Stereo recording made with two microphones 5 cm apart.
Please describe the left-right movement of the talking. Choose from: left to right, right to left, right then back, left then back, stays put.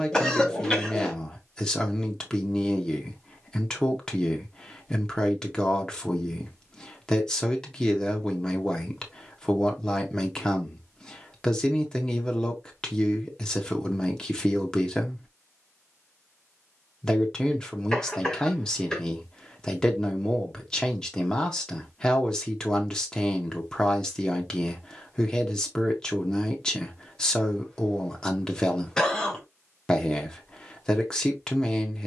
stays put.